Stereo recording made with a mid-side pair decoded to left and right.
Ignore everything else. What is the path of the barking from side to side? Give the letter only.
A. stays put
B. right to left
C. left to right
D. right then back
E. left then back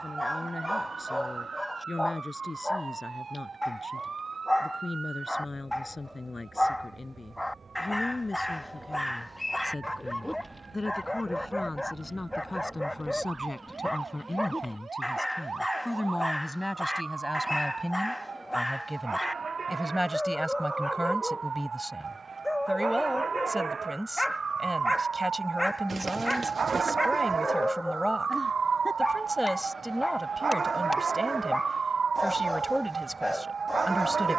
A.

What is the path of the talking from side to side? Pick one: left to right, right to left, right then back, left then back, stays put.
left to right.